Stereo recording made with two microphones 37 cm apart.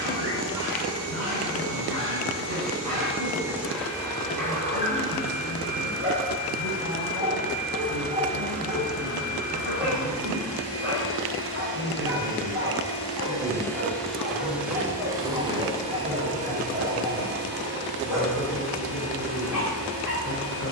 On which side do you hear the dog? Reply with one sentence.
You can hear the dog in the centre.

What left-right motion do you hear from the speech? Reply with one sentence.
You can hear the speech go from the right side to the left.